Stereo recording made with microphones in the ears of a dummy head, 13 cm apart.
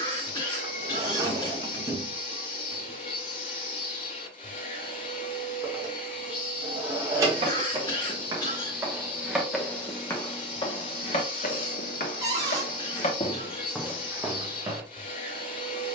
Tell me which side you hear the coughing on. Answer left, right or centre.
left.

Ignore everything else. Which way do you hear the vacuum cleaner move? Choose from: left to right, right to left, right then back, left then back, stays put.
stays put.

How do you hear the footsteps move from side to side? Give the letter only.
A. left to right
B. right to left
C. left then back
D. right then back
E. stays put
C.